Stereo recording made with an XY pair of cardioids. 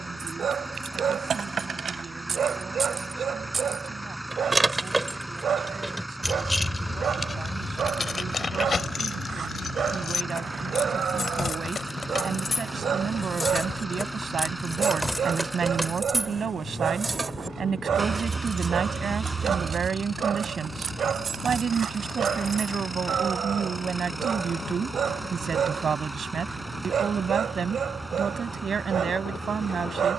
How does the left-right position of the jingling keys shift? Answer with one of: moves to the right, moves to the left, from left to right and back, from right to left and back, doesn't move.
from right to left and back.